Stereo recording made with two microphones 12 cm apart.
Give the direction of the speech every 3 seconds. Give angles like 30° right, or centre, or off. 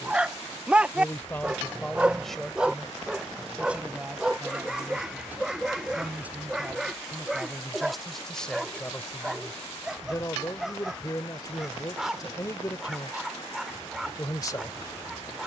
10° left, 10° right, centre, 30° left, 30° left.